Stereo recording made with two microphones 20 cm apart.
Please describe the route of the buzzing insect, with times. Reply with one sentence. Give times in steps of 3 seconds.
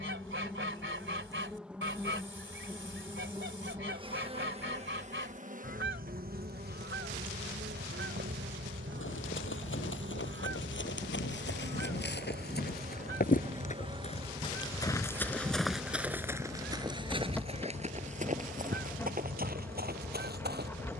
In this clip you hear the buzzing insect in the centre from 0 s, on the right from 3 s and in the centre from 15 s.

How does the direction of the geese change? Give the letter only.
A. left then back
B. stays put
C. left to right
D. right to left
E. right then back
B.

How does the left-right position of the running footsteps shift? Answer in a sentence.
You can hear the running footsteps go from the left side to the right.